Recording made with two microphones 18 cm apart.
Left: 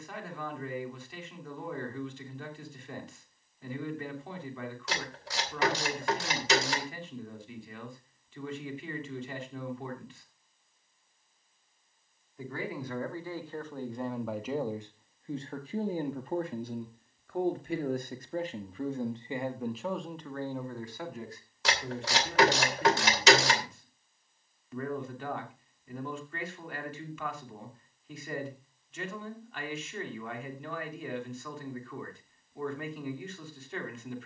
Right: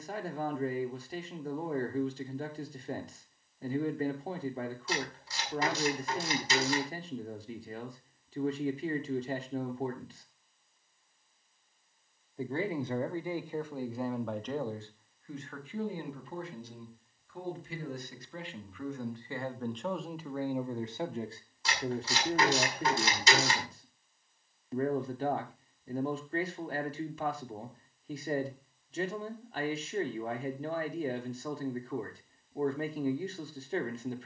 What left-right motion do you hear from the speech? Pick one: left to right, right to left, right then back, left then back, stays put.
left then back.